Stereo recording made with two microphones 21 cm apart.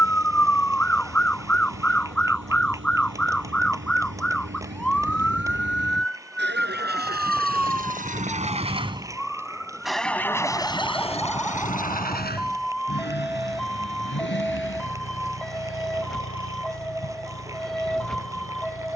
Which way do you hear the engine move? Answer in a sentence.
In this clip you hear the engine move to the left.